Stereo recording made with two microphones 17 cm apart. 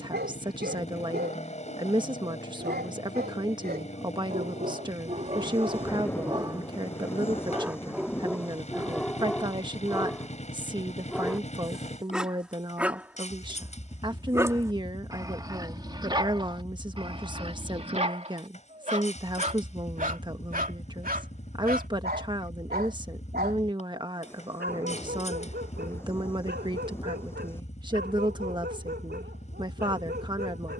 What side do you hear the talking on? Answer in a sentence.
You can hear the talking on the right.